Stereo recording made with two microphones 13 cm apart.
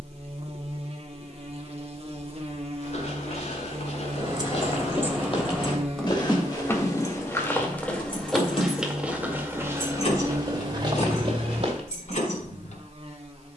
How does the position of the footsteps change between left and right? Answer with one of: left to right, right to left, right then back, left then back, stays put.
left to right.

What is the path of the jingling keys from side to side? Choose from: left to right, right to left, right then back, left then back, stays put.
right to left.